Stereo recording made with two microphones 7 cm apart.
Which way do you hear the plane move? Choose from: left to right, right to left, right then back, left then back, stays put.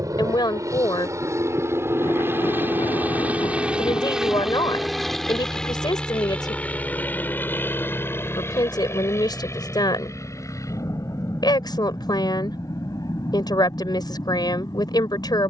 right to left.